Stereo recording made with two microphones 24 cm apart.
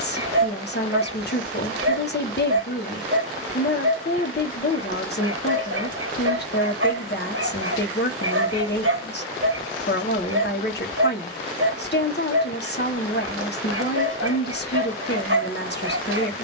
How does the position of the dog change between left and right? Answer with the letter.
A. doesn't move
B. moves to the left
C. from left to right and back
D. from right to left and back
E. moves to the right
A.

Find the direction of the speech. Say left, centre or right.
left.